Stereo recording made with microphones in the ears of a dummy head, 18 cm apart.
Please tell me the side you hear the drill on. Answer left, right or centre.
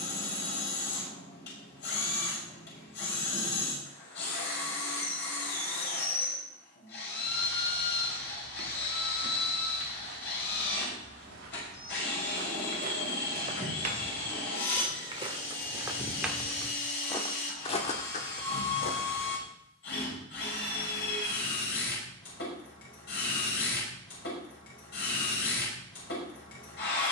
left.